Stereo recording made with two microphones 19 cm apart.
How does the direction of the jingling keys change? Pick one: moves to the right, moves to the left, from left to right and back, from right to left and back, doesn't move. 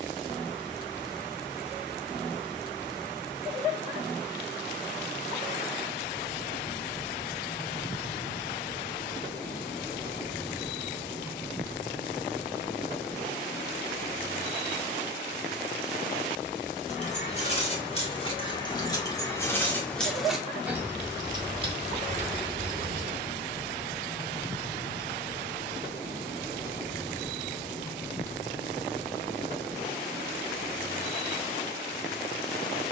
moves to the right.